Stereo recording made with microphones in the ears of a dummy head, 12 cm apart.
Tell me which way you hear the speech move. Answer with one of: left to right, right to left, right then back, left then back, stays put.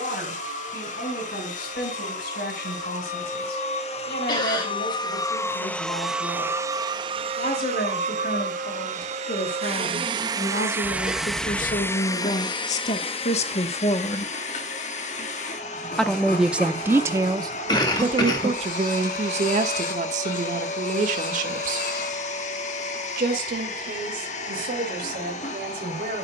left to right.